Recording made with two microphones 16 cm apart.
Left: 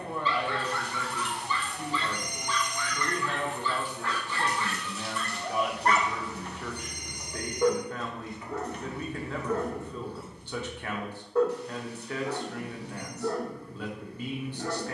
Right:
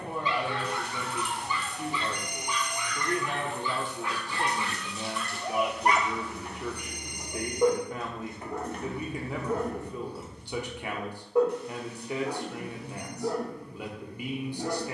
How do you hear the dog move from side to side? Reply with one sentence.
In this clip you hear the dog stay put.